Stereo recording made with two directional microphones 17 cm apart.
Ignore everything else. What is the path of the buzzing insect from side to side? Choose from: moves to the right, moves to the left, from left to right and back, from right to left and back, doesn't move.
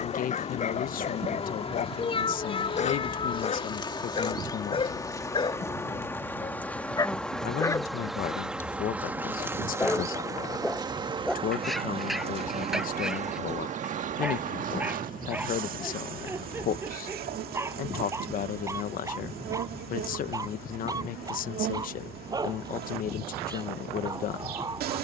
moves to the right.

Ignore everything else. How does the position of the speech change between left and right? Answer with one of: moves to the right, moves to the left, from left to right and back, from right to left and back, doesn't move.
doesn't move.